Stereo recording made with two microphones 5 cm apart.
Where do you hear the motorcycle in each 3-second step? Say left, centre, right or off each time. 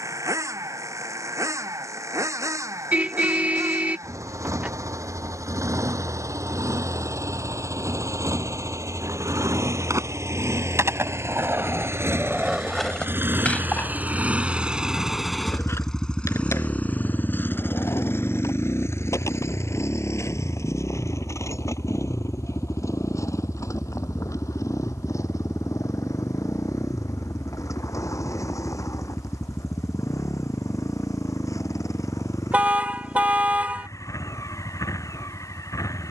right, right, right, right, right, left, left, left, left, left, left, left.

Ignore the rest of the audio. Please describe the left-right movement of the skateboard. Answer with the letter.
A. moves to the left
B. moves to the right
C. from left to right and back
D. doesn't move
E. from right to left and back
A.